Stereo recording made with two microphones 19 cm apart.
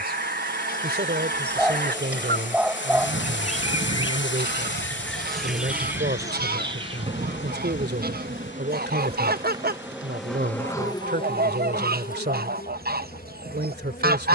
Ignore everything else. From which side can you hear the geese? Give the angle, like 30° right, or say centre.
50° right.